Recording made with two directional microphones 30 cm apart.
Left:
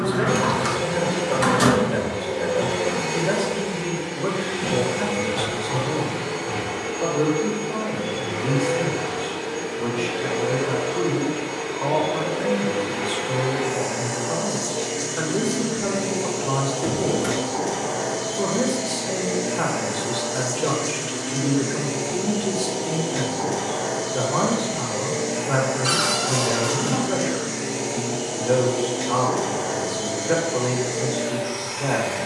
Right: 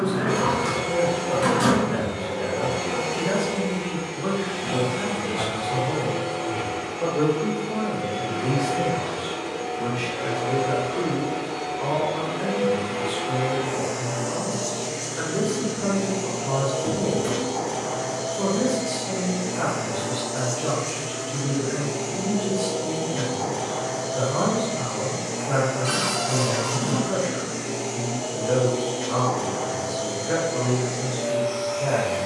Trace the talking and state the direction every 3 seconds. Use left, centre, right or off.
left, left, centre, centre, left, left, left, left, left, left, left.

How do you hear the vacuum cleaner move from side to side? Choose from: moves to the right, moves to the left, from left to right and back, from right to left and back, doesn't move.
doesn't move.